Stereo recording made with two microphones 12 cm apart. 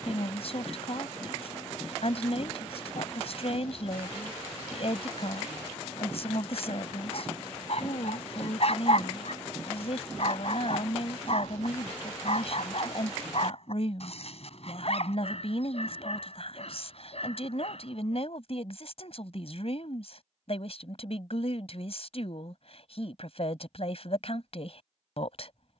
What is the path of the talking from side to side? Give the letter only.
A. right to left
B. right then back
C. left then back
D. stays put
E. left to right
D.